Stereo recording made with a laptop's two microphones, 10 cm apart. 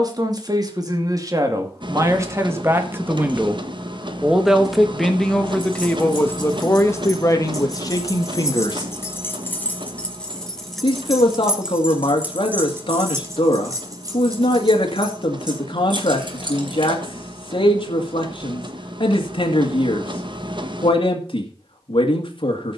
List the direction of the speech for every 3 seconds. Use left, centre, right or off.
right, centre, left, left, left, left, left, left.